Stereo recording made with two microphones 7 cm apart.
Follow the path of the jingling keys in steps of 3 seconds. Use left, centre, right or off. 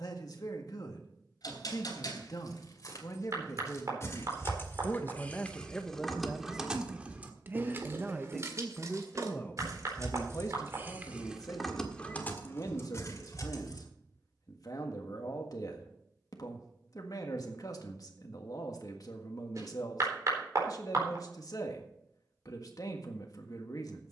left, left, right, right, left, off, off, off.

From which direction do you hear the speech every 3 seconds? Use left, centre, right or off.
left, left, centre, left, left, left, left, left.